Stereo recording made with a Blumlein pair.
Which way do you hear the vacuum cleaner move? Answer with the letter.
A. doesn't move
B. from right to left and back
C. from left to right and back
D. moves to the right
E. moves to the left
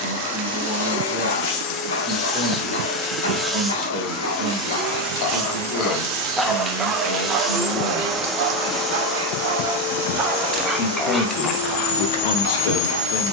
C.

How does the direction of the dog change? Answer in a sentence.
You can hear the dog go right and come back.